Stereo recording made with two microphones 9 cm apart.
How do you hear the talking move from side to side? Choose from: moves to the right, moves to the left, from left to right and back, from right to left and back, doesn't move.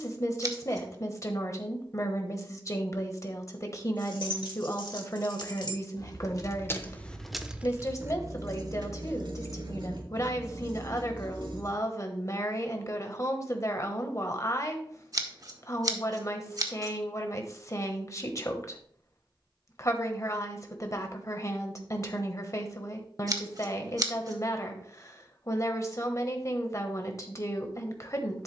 doesn't move.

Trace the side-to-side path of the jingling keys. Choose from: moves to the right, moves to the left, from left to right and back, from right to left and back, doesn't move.
moves to the right.